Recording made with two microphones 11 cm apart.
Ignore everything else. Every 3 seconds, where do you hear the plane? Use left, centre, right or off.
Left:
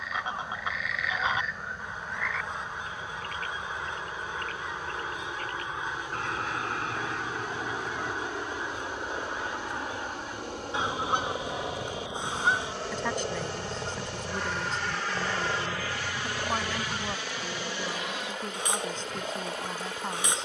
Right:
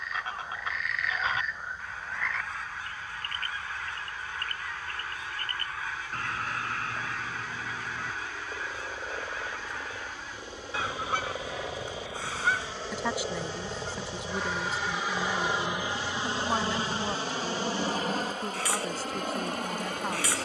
left, left, left, left, centre, right, right.